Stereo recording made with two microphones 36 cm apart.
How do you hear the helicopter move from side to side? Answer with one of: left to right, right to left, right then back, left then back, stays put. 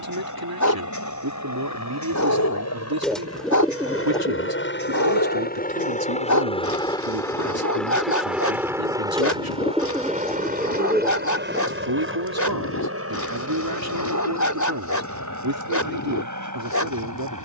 left to right.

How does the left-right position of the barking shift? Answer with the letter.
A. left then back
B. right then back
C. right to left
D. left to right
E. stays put
E.